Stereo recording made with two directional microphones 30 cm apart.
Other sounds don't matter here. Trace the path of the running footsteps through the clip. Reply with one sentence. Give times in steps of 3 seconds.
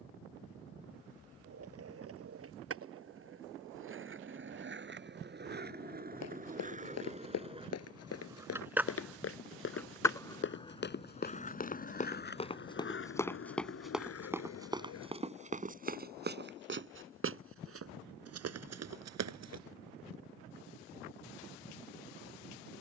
In this clip you hear the running footsteps not at all from 0 s, on the left from 6 s, in the centre from 12 s, on the right from 15 s and not at all from 21 s.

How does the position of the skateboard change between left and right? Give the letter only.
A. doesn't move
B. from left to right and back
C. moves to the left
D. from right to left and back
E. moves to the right
C.